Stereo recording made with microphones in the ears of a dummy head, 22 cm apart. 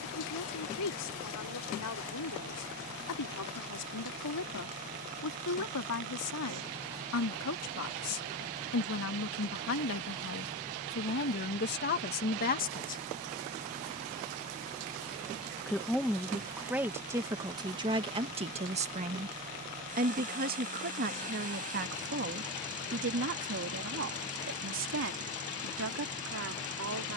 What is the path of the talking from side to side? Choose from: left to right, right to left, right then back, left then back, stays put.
left to right.